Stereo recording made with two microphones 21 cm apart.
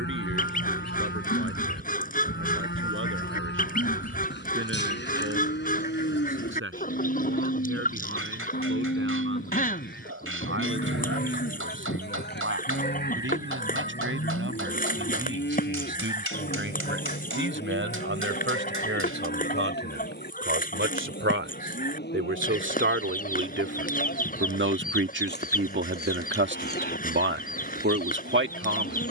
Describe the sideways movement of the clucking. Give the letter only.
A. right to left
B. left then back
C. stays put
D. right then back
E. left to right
C.